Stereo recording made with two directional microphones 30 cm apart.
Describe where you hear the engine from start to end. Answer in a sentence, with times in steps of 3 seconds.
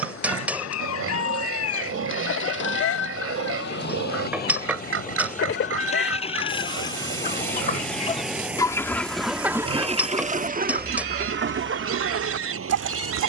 In this clip you hear the engine on the left from 0 s, in the centre from 6 s and on the right from 9 s.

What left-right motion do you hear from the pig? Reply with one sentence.
In this clip you hear the pig stay put.